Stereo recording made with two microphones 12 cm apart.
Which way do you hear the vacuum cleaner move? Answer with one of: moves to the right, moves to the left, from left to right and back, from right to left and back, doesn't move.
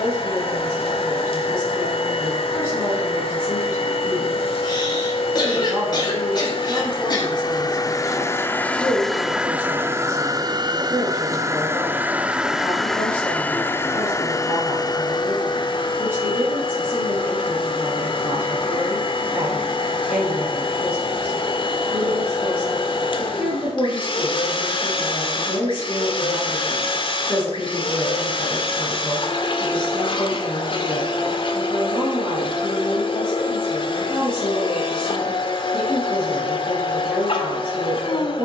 from left to right and back.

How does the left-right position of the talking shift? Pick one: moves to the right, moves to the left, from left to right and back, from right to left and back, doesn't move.
doesn't move.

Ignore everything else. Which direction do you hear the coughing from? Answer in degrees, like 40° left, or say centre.
40° left.